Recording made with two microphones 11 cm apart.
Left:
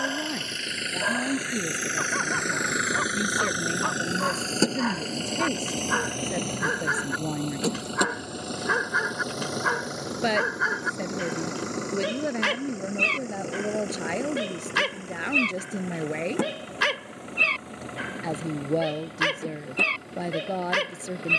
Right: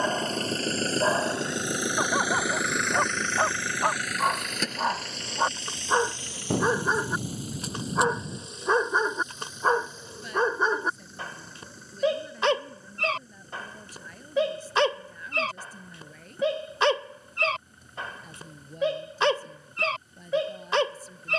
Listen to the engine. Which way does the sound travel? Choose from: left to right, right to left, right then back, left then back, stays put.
right to left.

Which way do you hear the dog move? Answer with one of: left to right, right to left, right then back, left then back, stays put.
stays put.